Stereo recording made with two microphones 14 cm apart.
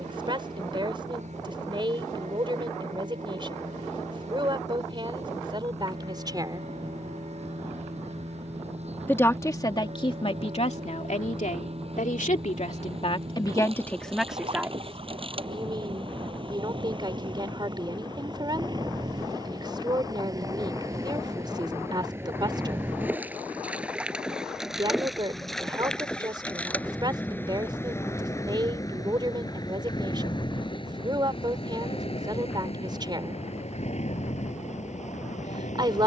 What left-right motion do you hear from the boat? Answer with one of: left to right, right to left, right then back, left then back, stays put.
right to left.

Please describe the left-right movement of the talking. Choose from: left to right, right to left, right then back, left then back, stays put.
left then back.